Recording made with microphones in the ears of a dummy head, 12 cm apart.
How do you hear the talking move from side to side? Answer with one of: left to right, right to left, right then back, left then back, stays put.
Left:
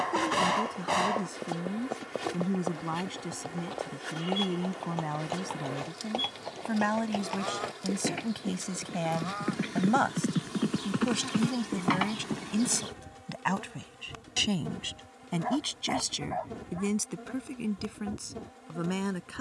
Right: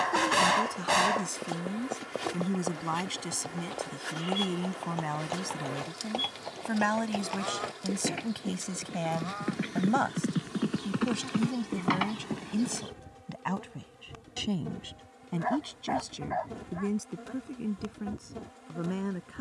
right to left.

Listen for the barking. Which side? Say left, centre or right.
right.